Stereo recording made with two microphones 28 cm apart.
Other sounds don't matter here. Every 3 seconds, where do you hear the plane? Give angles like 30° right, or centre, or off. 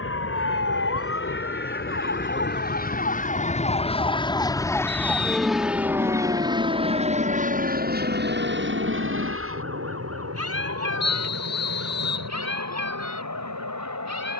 40° left, 10° left, 30° right, 50° right, 60° right.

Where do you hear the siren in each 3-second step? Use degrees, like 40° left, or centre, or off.
50° left, 10° left, 30° right, 50° right, 60° right.